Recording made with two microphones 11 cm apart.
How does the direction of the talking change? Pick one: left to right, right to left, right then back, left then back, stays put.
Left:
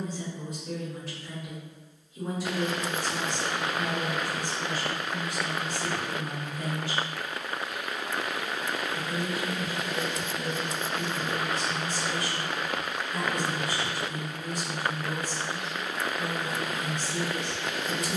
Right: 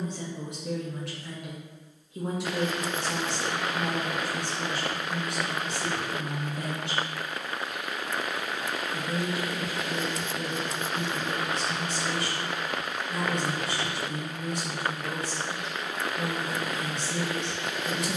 stays put.